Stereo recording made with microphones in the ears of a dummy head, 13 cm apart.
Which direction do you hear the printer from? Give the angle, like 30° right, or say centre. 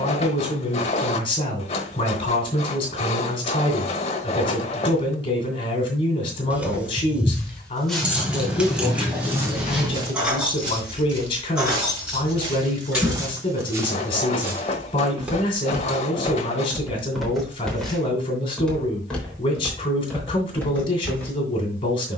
50° left.